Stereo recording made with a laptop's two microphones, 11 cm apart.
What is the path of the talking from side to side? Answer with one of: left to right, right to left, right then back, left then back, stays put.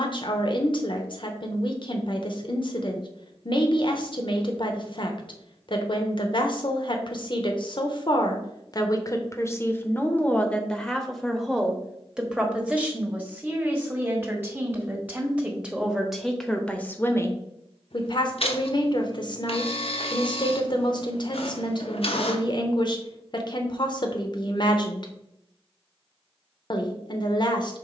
right then back.